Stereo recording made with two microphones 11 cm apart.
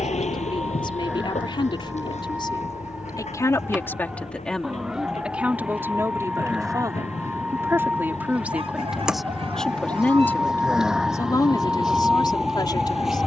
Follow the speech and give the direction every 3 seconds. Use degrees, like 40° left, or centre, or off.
50° left, 10° left, 20° right, 20° left, 40° left.